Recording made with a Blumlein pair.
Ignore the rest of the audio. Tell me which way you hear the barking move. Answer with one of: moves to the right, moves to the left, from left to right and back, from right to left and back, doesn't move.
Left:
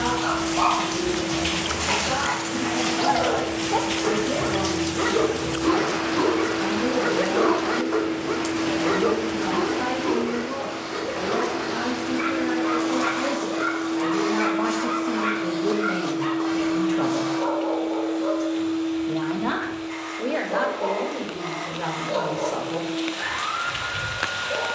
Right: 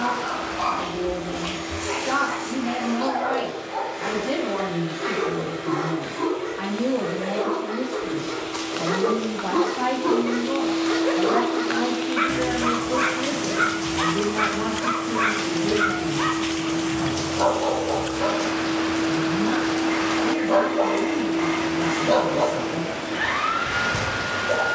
moves to the right.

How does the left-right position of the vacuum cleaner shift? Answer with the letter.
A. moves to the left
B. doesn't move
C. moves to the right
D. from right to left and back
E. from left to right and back
D.